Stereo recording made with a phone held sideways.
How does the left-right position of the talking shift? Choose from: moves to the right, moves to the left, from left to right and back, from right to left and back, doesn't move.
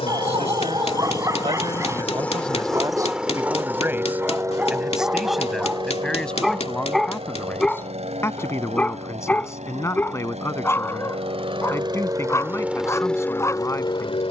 moves to the left.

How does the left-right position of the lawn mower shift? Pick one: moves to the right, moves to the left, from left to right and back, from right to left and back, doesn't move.
from left to right and back.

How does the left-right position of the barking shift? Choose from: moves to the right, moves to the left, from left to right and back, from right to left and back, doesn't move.
moves to the left.